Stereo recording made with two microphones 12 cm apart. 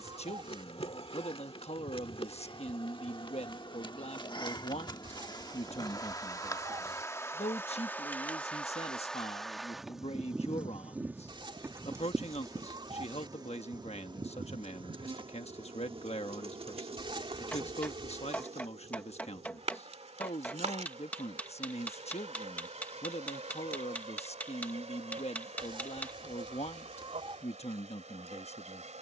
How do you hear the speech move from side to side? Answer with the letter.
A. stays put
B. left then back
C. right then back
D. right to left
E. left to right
A.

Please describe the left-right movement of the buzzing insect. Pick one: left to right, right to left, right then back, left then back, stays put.
left to right.